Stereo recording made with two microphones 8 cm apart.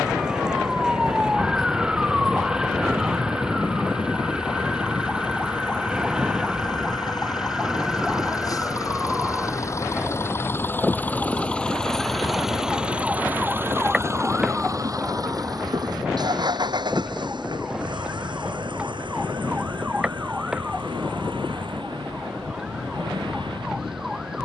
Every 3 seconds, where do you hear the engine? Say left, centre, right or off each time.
left, left, left, left, right, right, right, right.